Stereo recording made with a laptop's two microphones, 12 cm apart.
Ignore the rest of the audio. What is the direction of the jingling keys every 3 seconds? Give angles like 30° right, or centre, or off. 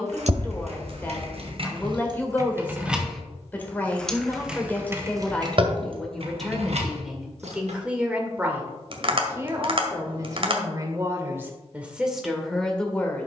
50° right, 20° right, 60° right, off, off.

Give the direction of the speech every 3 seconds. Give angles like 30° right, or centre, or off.
20° left, 10° left, 10° right, 20° right, centre.